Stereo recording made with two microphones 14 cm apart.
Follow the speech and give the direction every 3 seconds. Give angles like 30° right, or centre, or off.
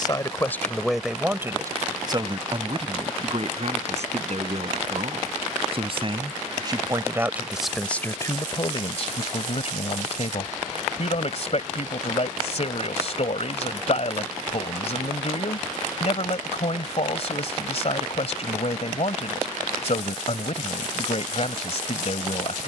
10° right, 50° right, centre, 50° left, 50° left, 50° left, 50° left, 50° left.